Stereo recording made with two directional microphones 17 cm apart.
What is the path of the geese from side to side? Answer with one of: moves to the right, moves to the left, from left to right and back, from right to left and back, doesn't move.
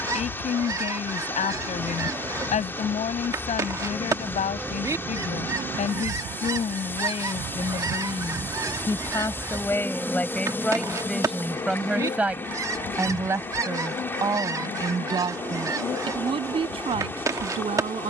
doesn't move.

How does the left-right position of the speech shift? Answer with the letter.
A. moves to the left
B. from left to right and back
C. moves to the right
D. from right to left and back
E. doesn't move
C.